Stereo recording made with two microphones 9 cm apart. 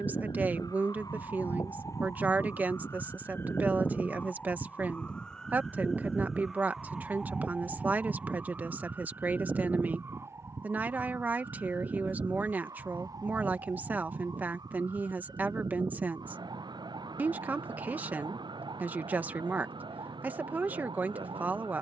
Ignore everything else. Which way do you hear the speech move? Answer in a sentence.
You can hear the speech stay put.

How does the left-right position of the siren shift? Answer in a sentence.
In this clip you hear the siren go from the left side to the right.